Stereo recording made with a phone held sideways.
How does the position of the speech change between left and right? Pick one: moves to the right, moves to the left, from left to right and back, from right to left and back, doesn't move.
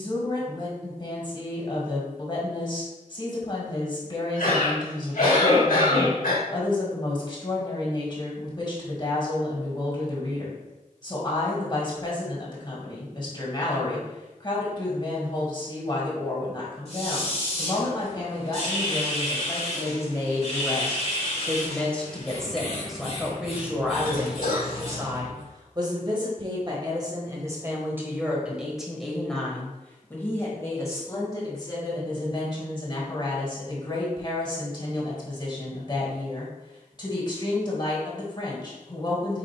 from left to right and back.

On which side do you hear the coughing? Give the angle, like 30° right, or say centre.
80° left.